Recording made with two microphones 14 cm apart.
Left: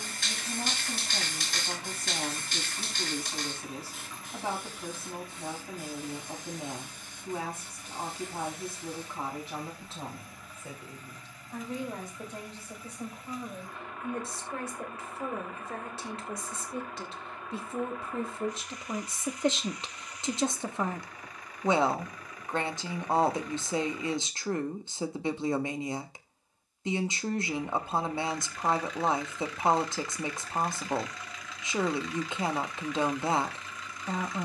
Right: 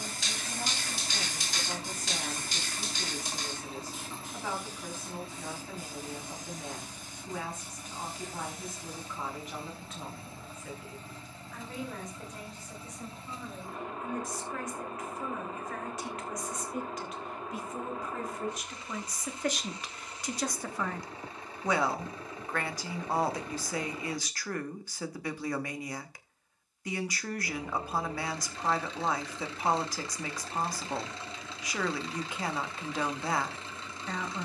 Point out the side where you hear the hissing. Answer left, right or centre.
left.